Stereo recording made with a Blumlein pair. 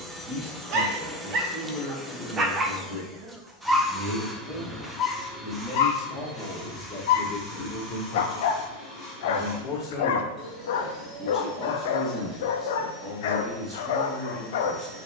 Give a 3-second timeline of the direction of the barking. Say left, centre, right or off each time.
right, left, left, left, left.